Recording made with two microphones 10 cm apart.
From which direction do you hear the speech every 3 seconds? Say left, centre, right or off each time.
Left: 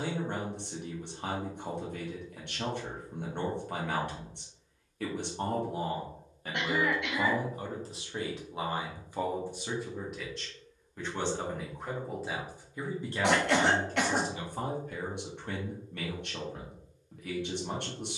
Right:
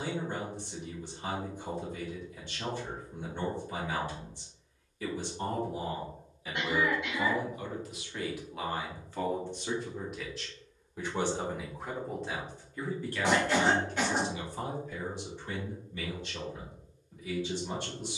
left, left, left, centre, left, left.